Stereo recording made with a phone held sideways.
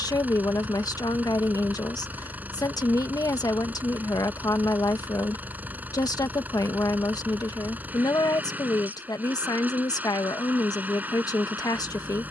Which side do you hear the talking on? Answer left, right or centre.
left.